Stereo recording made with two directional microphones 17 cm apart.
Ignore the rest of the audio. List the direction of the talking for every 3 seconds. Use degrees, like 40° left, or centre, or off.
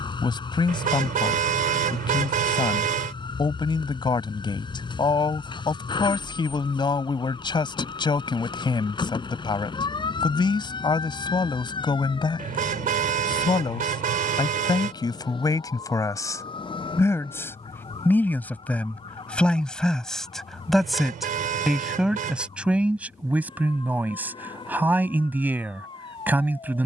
30° left, 30° left, 30° left, 30° left, 20° left, 20° left, centre, 10° right, 10° right.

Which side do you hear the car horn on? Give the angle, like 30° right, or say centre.
50° right.